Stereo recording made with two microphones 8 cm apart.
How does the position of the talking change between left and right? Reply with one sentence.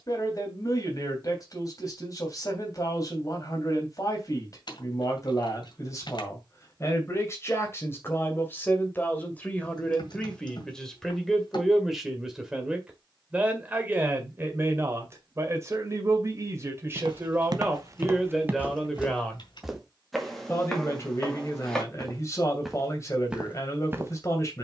In this clip you hear the talking move from left to right and back again.